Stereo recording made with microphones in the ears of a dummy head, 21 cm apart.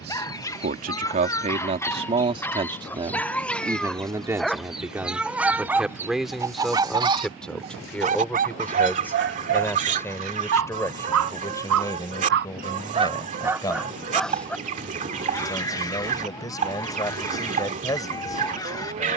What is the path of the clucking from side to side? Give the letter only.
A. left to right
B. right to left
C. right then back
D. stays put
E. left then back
A.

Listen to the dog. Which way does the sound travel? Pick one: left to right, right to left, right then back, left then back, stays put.
right then back.